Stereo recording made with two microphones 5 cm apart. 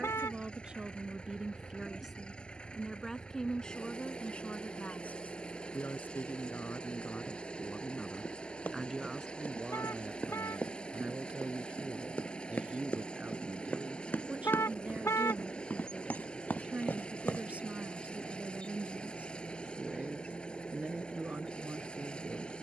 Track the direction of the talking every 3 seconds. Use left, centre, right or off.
centre, left, left, right, right, right, right, right.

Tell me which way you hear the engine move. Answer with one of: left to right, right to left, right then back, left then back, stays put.
stays put.